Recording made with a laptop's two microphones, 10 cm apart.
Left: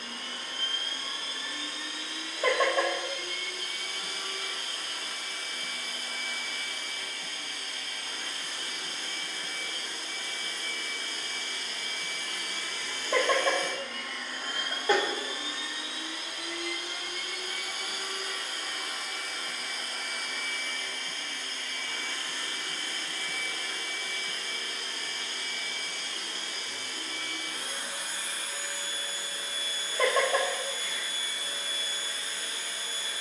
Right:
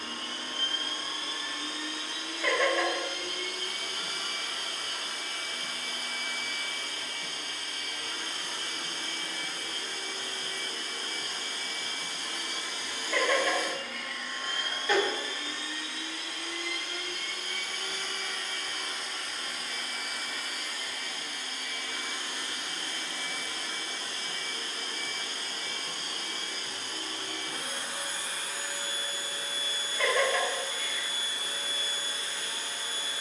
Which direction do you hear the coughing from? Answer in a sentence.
You can hear the coughing on the left.